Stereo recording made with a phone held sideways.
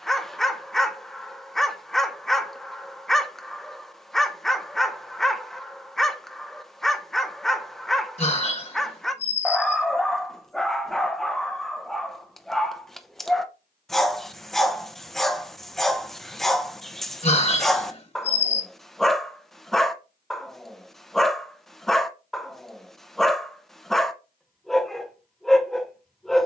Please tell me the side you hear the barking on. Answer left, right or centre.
centre.